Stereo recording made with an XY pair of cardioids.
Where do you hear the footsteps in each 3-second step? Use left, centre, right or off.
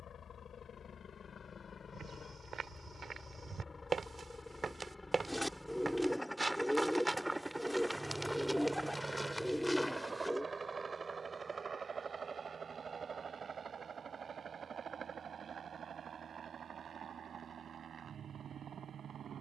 right, right, centre, centre, off, off, off.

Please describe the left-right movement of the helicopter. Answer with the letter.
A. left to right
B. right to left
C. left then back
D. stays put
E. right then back
A.